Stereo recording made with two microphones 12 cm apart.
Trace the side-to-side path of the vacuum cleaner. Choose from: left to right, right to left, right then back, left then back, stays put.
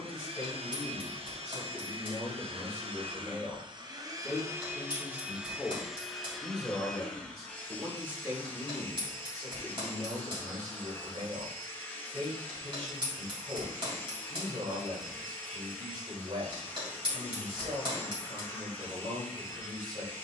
right to left.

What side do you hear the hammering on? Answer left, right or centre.
right.